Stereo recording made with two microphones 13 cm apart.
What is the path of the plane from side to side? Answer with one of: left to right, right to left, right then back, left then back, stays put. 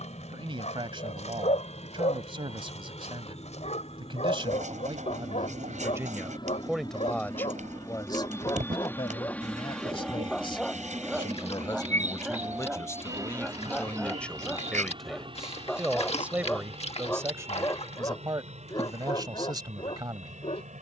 left to right.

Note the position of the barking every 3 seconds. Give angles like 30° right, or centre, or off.
60° left, 60° left, 40° left, 10° left, centre, 20° left, 40° left.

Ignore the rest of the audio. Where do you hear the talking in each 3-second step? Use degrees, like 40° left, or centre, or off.
40° right, 40° right, 10° left, 40° left, 20° left, 10° right, 30° right.